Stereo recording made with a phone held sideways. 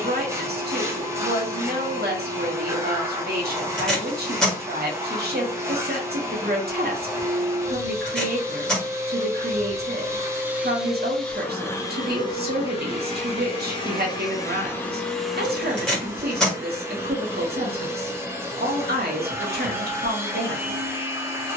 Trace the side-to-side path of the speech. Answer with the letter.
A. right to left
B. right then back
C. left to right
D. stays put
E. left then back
D.